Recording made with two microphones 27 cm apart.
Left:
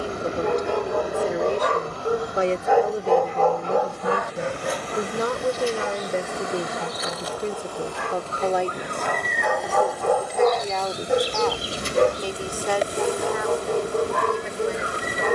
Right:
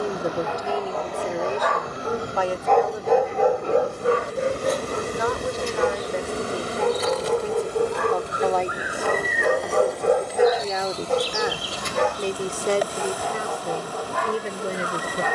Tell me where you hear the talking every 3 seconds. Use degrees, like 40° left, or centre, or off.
10° left, 40° left, 20° left, 10° right, 30° right.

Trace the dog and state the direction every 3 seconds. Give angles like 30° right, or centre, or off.
40° left, 40° right, 60° right, 10° right, 50° left.